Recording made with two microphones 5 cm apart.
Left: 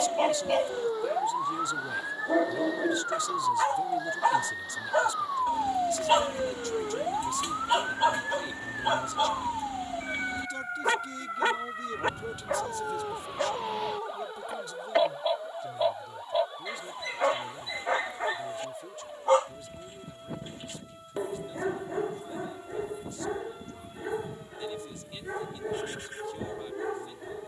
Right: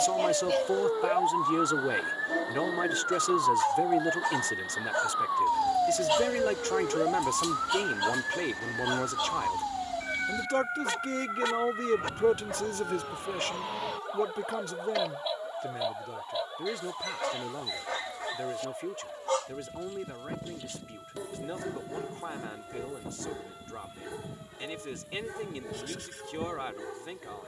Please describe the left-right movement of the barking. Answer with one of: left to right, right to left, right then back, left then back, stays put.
stays put.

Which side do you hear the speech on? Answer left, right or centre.
right.